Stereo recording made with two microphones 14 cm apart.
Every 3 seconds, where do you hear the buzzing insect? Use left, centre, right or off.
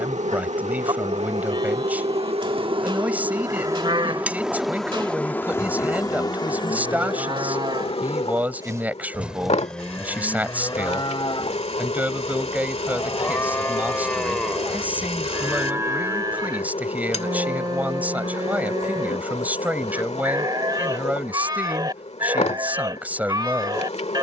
right, centre, left, left, left, left, left, left.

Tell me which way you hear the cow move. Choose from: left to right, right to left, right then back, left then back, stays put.
left then back.